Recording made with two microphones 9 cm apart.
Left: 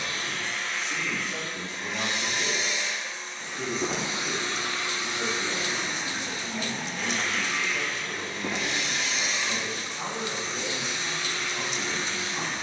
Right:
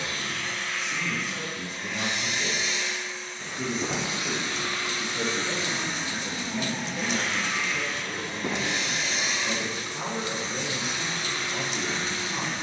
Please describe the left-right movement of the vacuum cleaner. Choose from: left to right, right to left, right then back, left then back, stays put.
left to right.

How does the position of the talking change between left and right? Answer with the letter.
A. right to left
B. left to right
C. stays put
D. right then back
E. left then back
B.